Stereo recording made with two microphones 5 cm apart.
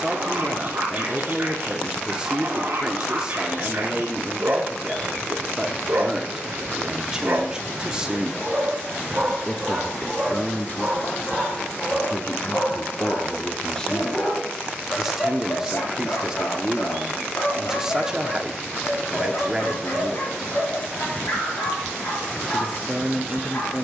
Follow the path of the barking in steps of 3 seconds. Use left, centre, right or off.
right, right, right, centre, left, left, left, left.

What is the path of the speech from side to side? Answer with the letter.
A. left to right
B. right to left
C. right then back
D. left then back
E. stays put
D.